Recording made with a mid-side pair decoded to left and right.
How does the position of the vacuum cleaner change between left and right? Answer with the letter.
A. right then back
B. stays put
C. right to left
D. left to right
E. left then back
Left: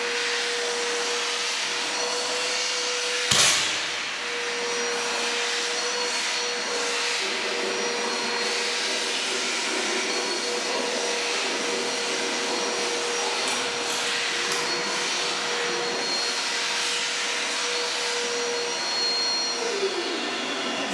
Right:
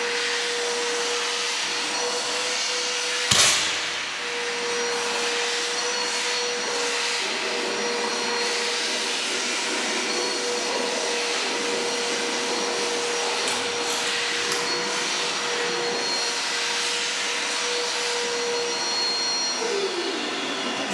B.